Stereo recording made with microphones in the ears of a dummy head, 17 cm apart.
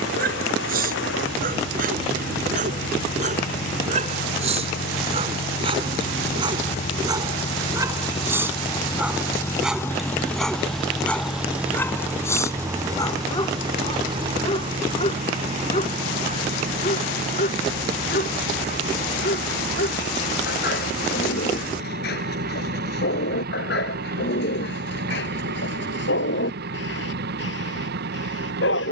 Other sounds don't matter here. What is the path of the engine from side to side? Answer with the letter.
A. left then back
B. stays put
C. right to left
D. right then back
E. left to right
E.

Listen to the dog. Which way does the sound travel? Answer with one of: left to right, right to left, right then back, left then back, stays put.
right to left.